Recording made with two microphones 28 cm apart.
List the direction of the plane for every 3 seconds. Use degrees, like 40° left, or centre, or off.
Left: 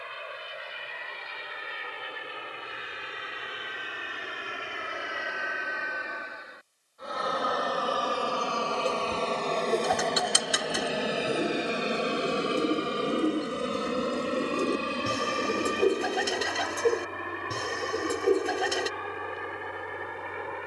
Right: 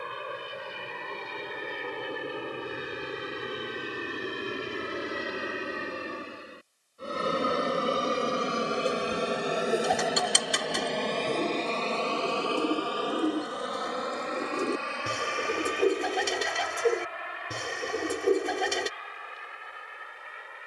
60° right, 50° right, 30° right, centre, 30° left, 50° left, 60° left.